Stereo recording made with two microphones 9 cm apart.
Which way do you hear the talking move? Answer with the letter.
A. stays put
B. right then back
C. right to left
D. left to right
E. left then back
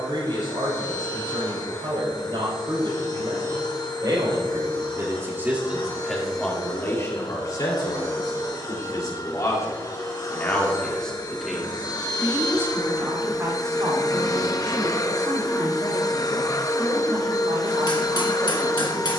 E.